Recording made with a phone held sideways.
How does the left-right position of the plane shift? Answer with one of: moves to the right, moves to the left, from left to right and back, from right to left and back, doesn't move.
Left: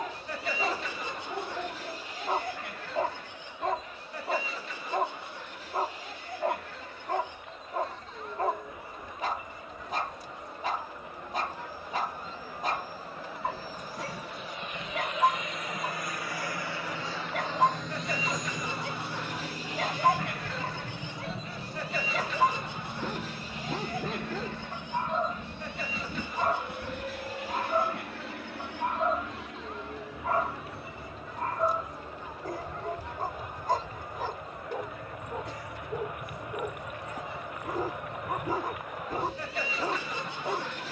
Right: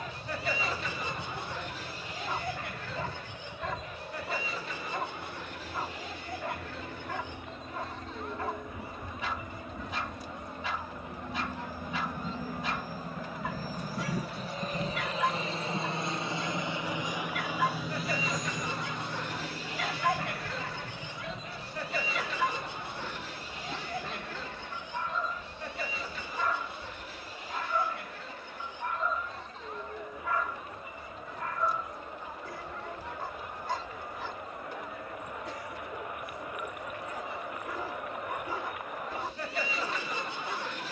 moves to the left.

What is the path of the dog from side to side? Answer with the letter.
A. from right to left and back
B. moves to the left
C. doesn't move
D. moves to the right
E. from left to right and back
C.